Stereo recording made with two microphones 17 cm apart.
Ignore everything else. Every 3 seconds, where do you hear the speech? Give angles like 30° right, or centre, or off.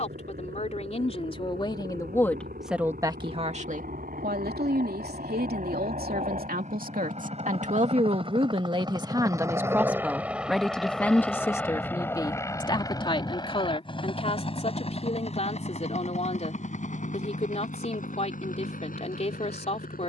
30° left, 60° right, 50° right, centre, 30° left, 40° left, 40° left.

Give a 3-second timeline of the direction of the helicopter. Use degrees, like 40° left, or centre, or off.
70° right, 60° right, 40° right, 10° right, 30° left, 40° left, 50° left.